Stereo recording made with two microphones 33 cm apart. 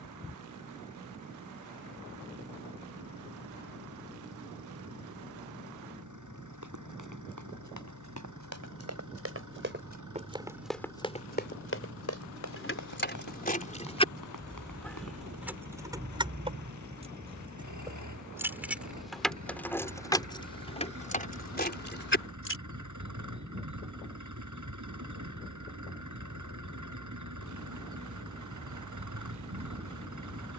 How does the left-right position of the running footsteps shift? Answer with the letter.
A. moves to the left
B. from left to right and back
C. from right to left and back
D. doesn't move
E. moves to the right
A.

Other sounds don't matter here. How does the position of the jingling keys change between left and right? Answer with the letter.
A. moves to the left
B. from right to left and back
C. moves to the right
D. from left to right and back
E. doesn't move
D.